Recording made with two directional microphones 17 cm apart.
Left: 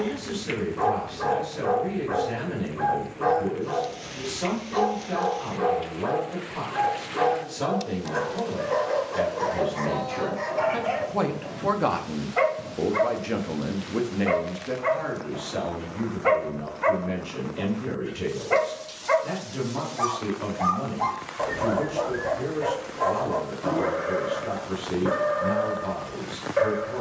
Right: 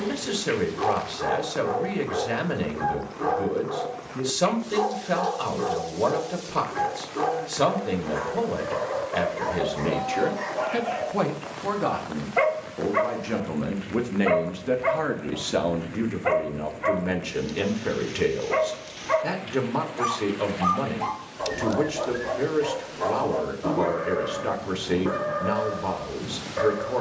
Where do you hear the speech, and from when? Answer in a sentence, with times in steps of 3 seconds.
You can hear the speech on the right from 0 s, in the centre from 12 s and on the right from 15 s.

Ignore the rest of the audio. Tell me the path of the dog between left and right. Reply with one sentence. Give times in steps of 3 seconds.
In this clip you hear the dog on the left from 0 s, in the centre from 12 s and on the left from 15 s.